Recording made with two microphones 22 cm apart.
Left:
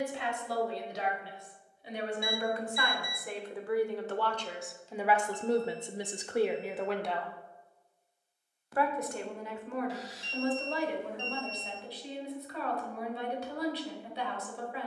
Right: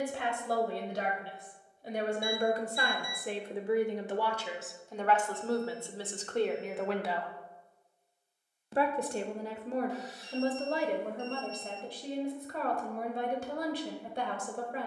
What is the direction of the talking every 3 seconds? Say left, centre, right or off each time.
right, centre, centre, right, right.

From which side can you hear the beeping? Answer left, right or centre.
left.